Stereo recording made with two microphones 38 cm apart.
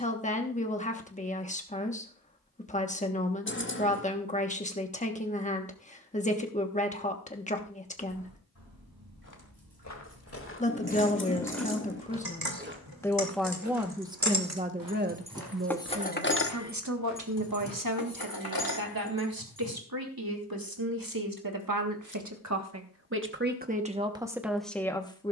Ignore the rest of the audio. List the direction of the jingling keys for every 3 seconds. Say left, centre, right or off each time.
off, off, right, right, right, left, left, off, off.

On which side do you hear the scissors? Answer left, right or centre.
left.